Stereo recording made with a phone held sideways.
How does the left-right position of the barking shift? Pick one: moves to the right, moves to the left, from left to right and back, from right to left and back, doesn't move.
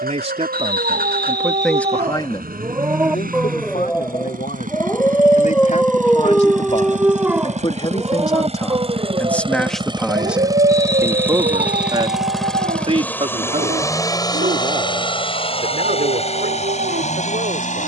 from right to left and back.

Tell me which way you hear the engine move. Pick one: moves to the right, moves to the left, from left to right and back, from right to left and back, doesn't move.
moves to the left.